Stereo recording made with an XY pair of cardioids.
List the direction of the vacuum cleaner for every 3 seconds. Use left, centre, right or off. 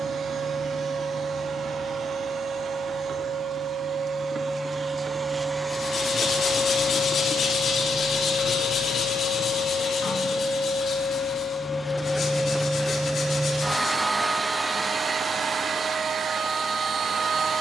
right, right, left, left, centre, right.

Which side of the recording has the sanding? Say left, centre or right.
left.